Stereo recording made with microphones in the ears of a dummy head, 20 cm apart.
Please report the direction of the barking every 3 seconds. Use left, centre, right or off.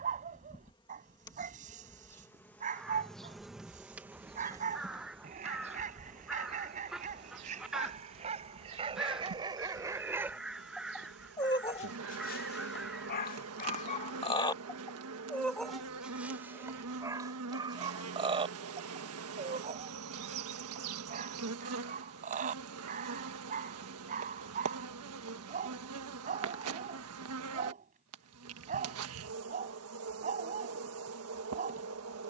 right, right, right, centre, left, centre, right, right, right, right, right.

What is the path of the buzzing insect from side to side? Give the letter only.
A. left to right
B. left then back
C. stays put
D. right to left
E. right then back
A.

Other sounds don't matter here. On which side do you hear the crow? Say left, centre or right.
centre.